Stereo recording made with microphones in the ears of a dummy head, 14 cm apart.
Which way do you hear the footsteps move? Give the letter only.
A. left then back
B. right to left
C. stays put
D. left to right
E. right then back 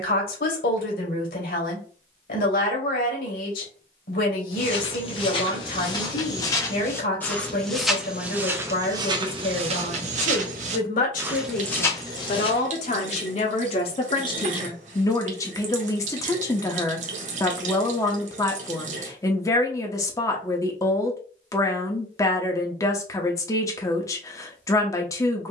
E.